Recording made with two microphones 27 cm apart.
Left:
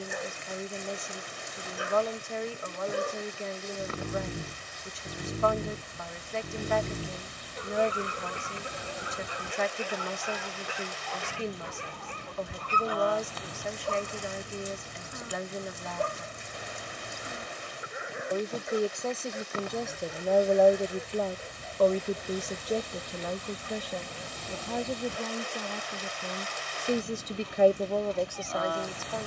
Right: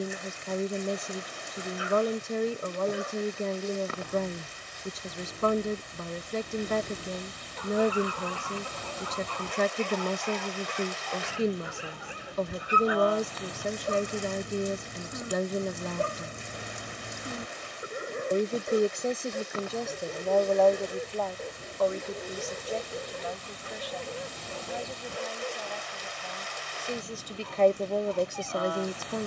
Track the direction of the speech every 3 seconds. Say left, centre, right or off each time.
right, right, right, right, right, right, centre, left, left, centre.